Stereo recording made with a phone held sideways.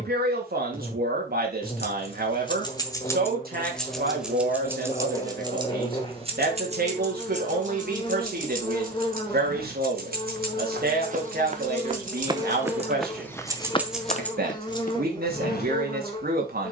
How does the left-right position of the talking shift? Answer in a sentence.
In this clip you hear the talking stay in one place.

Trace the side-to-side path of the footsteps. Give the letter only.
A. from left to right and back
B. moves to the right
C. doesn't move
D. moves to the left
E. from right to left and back
D.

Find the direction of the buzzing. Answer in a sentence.
In this clip you hear the buzzing on the left.